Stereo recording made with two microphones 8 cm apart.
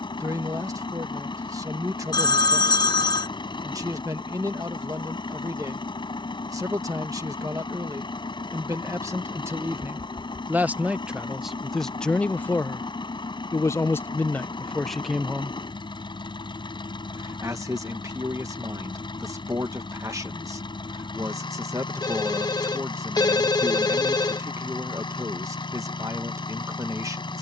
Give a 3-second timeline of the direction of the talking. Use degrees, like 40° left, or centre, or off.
50° right, 50° right, 40° right, 20° right, 20° left, 30° right, 40° right, 40° right, 40° right.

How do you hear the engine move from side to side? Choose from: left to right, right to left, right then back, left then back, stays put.
stays put.